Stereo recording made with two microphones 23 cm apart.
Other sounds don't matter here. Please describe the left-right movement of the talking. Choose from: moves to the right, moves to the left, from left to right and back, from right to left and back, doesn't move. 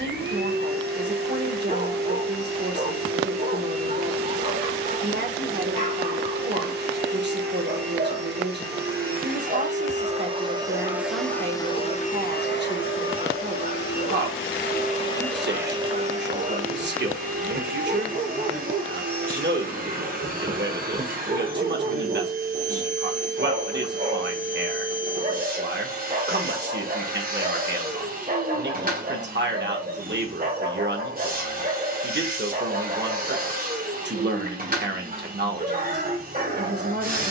doesn't move.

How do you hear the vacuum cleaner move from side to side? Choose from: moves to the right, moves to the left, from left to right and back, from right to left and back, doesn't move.
from right to left and back.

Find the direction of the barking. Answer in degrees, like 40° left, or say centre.
40° right.